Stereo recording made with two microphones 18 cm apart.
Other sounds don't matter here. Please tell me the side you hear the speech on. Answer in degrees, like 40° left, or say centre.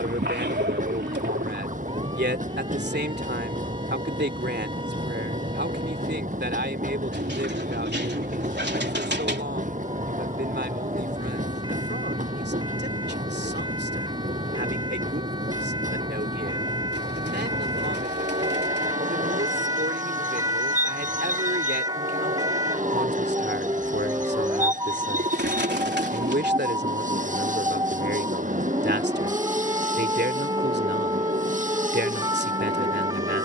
80° right.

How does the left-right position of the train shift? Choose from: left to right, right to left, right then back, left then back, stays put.
stays put.